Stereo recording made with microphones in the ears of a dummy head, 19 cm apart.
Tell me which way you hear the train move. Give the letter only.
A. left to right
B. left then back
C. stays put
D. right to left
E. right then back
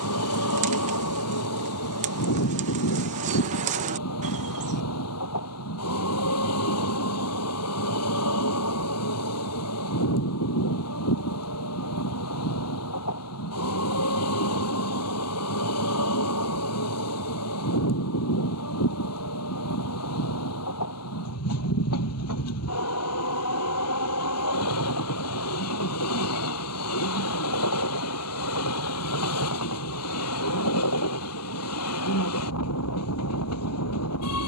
C.